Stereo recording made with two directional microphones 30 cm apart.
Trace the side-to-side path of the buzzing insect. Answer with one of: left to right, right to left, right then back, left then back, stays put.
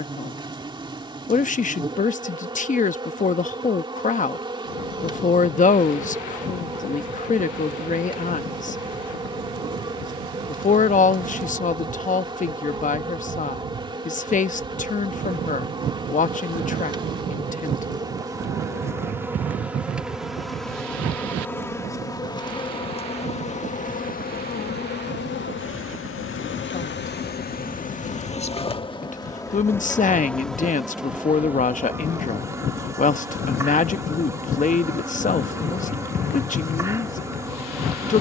left then back.